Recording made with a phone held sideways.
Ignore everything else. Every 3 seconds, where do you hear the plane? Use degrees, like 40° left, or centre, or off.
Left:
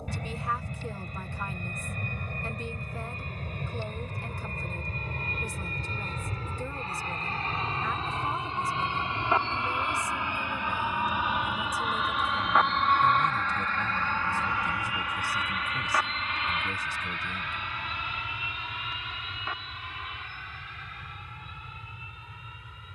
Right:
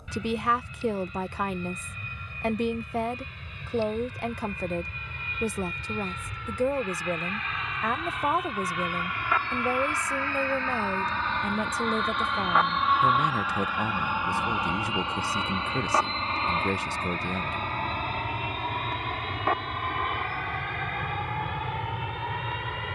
50° left, 50° left, 30° left, 20° left, 10° right, 40° right, 50° right, 60° right.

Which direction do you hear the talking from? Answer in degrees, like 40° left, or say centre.
70° right.